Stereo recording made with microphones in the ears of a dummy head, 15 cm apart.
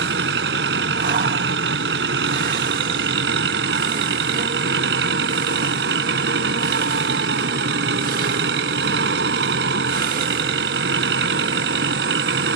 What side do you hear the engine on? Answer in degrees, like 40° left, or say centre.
70° right.